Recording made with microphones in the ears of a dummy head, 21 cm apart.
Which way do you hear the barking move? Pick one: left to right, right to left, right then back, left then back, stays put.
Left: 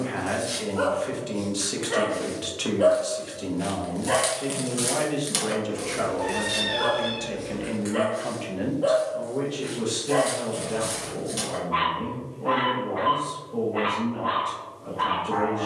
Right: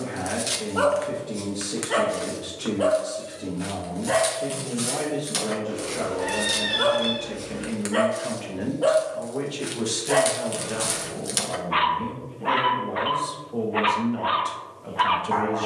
left then back.